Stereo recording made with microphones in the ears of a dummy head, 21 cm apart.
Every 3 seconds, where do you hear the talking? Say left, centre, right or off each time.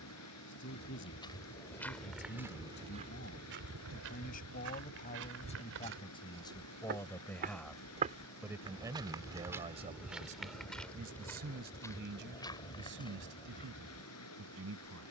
left, left, centre, right, right.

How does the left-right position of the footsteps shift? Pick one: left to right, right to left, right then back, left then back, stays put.
right then back.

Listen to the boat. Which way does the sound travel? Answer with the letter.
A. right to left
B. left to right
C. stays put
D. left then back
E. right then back
C.